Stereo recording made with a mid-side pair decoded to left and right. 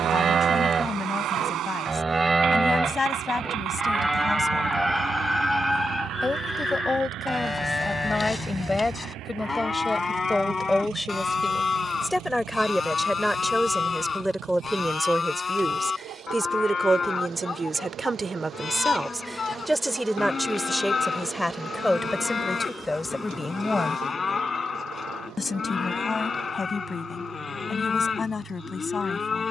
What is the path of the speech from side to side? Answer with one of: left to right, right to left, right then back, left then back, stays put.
right then back.